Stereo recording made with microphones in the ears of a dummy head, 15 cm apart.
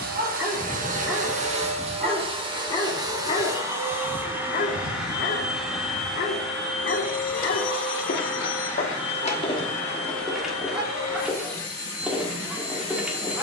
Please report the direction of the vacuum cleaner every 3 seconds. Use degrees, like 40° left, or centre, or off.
40° right, 10° right, 10° left, 10° left, 20° left.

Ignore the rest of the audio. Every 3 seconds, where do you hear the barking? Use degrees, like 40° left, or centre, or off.
centre, 50° left, 70° left, 10° left, 10° right.